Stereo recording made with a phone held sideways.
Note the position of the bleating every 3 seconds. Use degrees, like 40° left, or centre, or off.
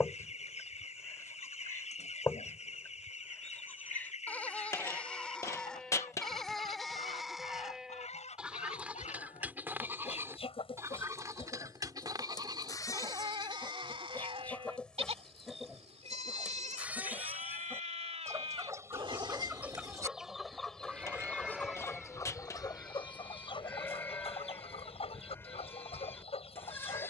20° left, 10° left, centre, 20° right, 30° right, 40° right, 30° right, centre, 10° left.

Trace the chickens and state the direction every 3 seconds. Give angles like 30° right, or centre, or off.
40° left, 40° left, 40° left, 30° left, 20° left, 10° right, 10° right, 20° left, 40° left.